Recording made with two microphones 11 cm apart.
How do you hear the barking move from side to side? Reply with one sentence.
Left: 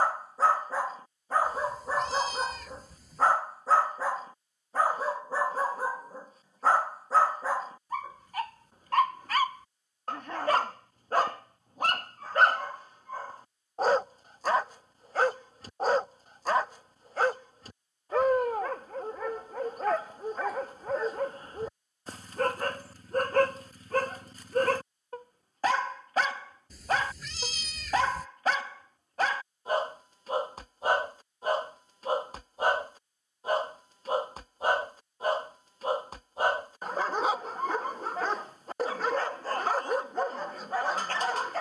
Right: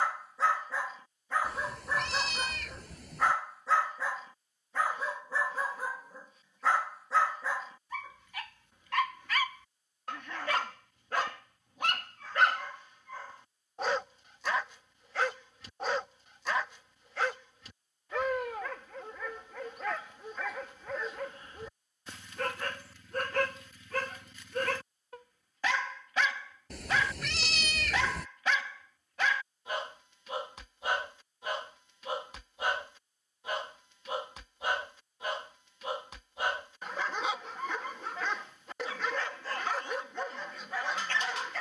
In this clip you hear the barking stay in one place.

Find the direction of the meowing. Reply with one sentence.
You can hear the meowing on the right.